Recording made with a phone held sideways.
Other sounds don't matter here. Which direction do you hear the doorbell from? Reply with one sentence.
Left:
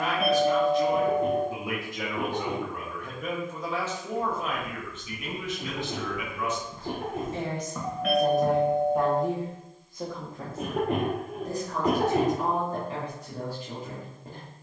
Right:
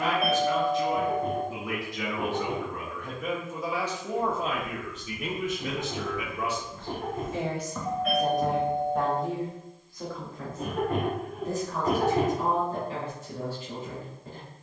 In this clip you hear the doorbell on the left.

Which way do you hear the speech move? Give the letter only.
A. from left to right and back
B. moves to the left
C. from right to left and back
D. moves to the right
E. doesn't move
A.